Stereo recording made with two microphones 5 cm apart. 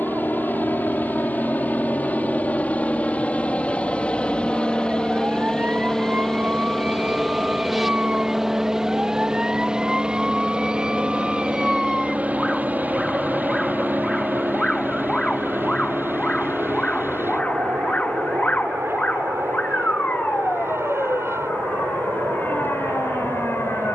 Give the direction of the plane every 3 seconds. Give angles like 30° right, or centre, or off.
40° left, 20° left, centre, 20° right, 40° right, 50° right, 60° right, 70° right.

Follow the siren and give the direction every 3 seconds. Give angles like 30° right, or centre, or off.
50° right, 40° right, 30° right, 10° right, 10° left, 20° left, 40° left, 50° left.